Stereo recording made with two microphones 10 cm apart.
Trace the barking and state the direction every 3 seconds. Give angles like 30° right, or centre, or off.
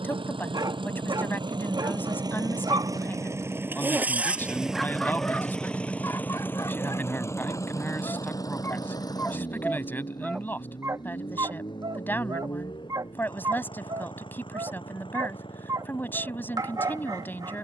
50° right, centre, 40° left, 10° right, 40° right, 40° right.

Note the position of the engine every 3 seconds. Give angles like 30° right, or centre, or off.
50° right, 10° right, 30° left, 50° left, 60° left, 60° left.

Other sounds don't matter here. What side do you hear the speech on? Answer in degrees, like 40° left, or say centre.
20° left.